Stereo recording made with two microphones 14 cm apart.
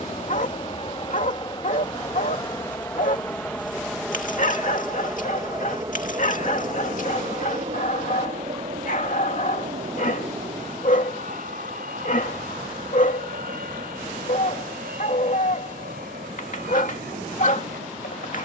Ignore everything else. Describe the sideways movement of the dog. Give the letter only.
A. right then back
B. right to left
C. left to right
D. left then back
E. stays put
E.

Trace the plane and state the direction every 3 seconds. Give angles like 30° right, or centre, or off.
30° left, centre, 40° right, 60° right, 70° right, 70° right.